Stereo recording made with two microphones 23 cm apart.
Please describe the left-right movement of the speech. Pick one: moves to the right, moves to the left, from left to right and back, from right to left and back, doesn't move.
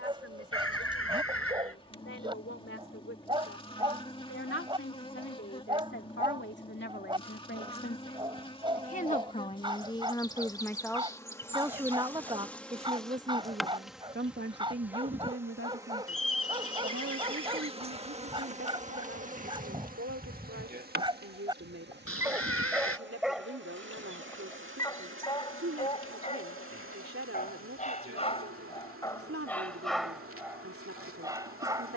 moves to the right.